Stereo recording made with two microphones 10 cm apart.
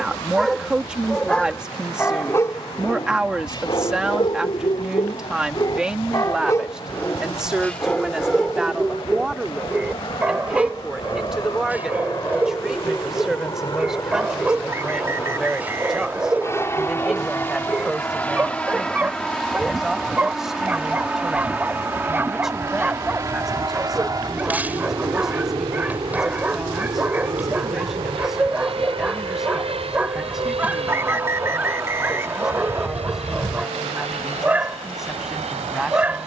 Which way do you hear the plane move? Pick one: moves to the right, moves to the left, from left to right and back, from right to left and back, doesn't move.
moves to the right.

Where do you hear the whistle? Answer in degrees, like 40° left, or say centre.
30° right.